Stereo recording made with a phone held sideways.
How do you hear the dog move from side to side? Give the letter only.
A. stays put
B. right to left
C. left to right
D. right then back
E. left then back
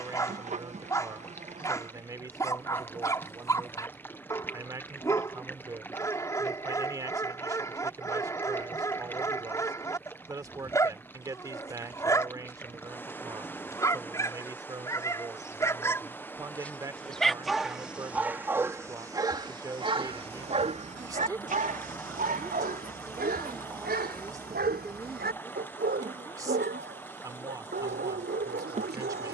C.